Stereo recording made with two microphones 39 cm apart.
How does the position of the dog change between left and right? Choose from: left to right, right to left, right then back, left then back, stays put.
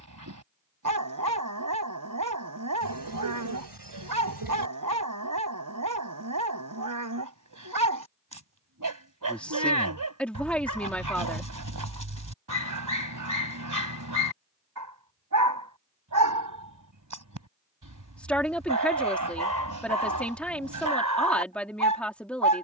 stays put.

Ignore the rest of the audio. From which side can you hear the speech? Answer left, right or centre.
centre.